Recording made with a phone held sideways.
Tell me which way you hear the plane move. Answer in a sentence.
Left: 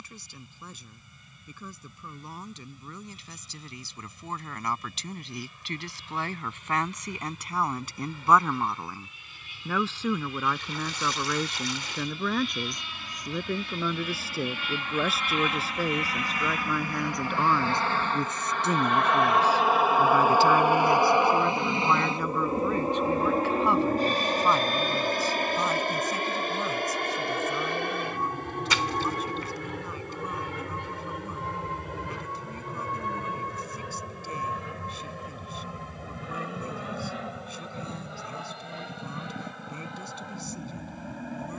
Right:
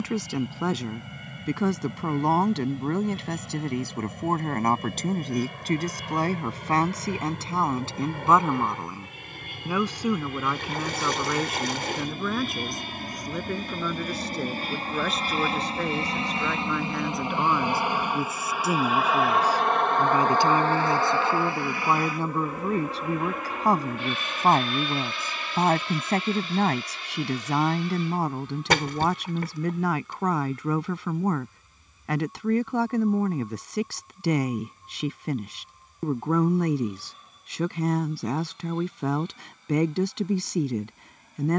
In this clip you hear the plane travel towards the left.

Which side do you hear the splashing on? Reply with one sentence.
You can hear the splashing on the right.